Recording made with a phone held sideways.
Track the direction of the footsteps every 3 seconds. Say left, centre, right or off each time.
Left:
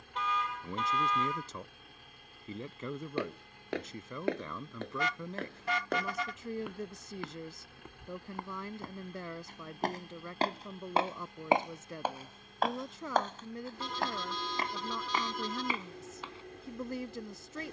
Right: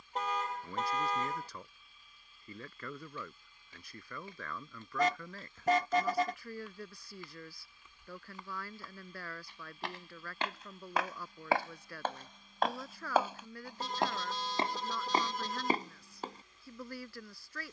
off, left, left, left, centre, right.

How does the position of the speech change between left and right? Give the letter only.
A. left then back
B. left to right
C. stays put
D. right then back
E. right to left
C.